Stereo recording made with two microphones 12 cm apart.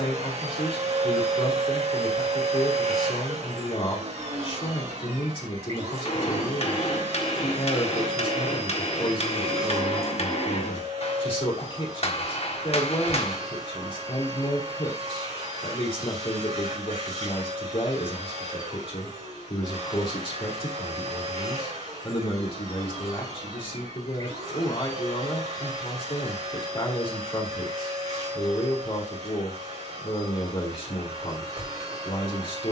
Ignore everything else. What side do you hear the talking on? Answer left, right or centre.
left.